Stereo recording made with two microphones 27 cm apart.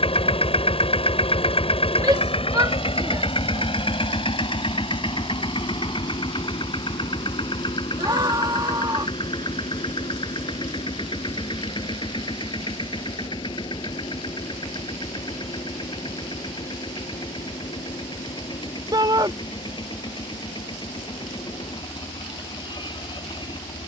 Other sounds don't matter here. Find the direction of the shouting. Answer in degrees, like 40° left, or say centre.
10° right.